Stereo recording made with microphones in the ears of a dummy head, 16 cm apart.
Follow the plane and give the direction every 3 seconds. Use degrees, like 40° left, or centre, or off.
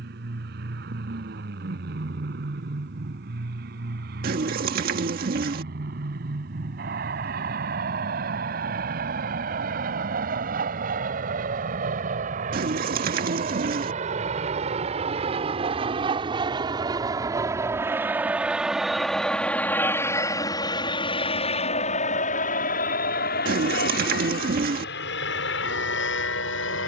60° right, 60° right, 60° right, 50° right, 40° right, 20° right, 10° left, 40° left, 60° left.